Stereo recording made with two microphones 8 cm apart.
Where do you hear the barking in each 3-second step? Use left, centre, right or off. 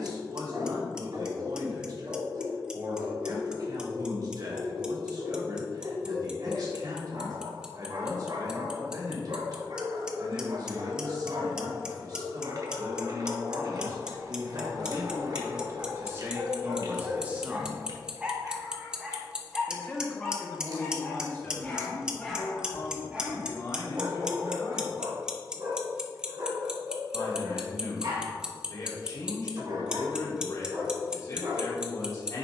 right, right, right, right, right, right, centre, centre, right, right, right.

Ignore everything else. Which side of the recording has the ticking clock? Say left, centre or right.
centre.